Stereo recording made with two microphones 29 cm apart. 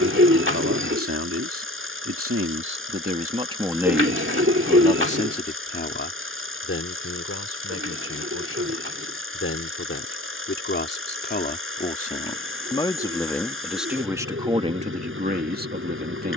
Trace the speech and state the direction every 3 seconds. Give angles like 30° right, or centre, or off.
50° right, 10° left, 50° left, 40° left, centre, 30° right.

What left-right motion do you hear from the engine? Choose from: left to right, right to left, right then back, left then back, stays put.
stays put.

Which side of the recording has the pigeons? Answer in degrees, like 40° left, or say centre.
40° right.